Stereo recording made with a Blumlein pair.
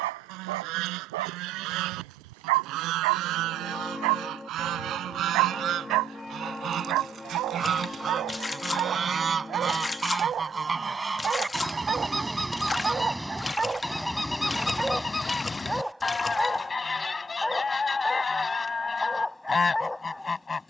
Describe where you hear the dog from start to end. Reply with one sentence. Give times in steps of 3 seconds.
In this clip you hear the dog on the right from 0 s and in the centre from 12 s.